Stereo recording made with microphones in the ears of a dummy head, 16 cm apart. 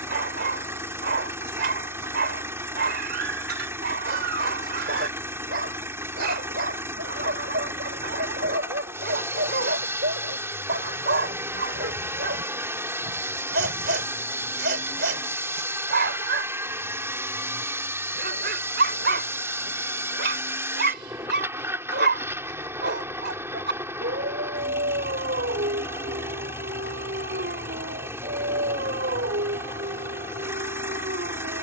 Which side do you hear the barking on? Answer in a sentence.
In this clip you hear the barking on the right.